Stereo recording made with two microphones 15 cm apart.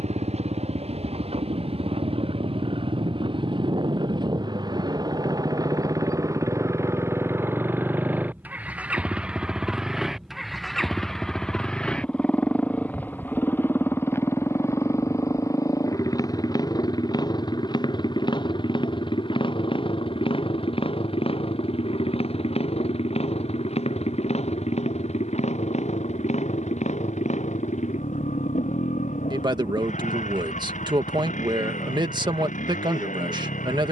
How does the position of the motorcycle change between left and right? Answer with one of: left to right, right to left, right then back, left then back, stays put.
right to left.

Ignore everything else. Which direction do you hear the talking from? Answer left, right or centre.
right.